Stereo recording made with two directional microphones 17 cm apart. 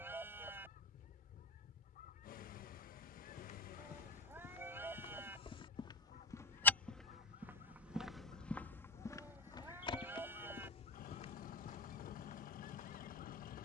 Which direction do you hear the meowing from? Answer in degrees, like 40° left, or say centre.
10° right.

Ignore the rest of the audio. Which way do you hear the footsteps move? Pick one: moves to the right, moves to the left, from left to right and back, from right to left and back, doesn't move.
from left to right and back.